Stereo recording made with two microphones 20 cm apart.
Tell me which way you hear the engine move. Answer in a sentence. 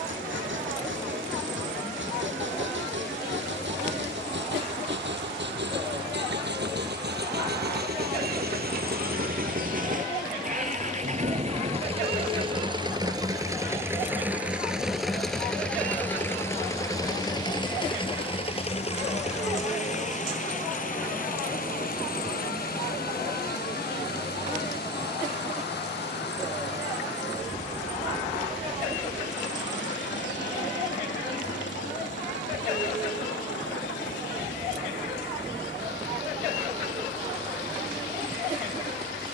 In this clip you hear the engine move to the left.